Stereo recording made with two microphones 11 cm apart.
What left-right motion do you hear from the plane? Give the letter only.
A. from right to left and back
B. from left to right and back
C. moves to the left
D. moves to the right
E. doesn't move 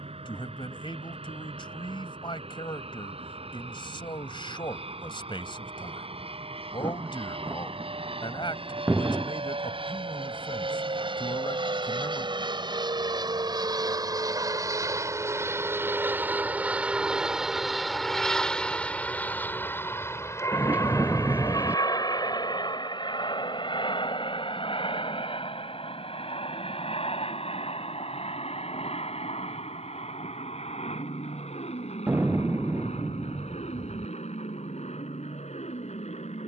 C.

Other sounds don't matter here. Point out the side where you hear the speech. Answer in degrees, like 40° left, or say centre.
50° left.